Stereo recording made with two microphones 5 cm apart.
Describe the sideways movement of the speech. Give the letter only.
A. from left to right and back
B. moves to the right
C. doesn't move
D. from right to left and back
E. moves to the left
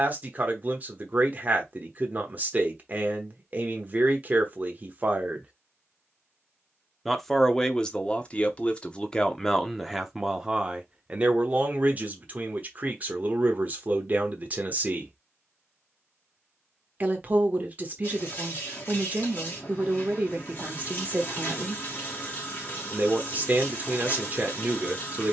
D.